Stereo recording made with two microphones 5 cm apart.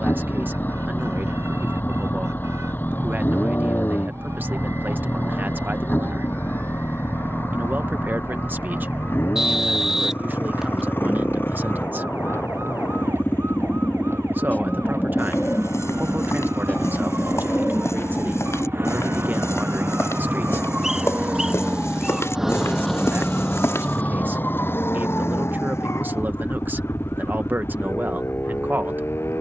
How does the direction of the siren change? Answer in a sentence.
You can hear the siren move from right to left.